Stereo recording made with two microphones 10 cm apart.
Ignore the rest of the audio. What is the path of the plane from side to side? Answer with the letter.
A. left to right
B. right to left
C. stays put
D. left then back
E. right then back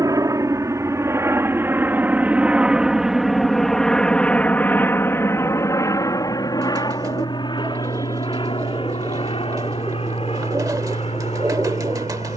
B.